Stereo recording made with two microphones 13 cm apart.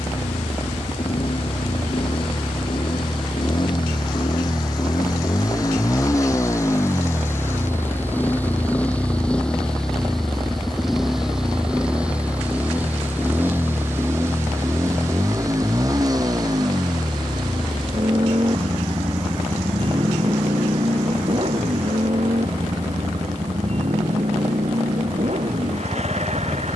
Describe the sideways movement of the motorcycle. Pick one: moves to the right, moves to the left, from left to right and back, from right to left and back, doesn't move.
moves to the right.